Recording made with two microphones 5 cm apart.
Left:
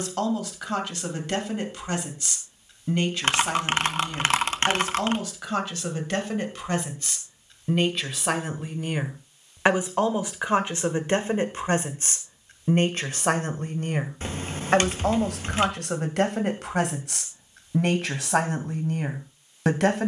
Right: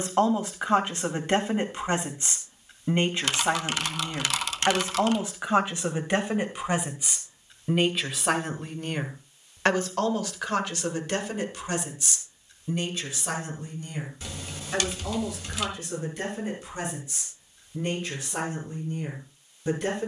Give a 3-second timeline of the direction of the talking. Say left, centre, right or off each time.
right, right, centre, left, left, left, left.